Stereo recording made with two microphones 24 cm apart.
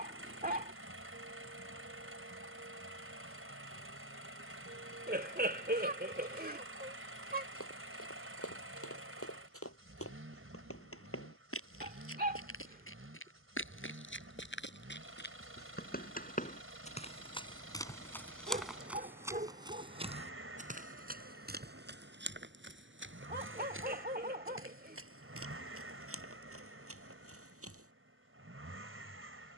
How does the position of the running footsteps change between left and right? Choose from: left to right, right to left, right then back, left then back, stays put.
left to right.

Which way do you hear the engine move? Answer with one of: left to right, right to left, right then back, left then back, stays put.
stays put.